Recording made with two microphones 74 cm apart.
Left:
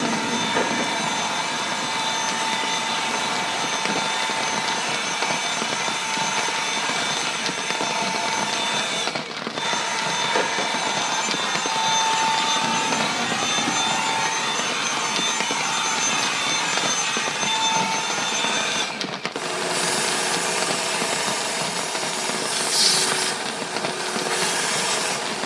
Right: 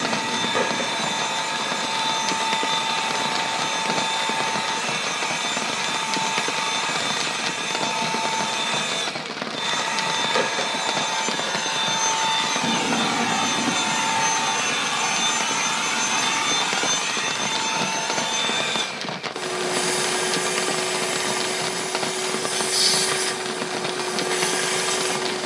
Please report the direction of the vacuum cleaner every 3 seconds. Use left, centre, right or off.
left, left, left, left, centre, centre, left, left, left.